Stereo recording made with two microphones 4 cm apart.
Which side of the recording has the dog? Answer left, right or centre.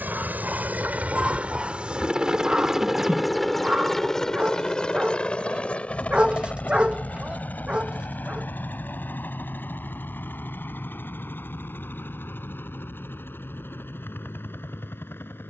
right.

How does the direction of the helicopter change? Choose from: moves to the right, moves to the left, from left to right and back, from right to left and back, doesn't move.
moves to the left.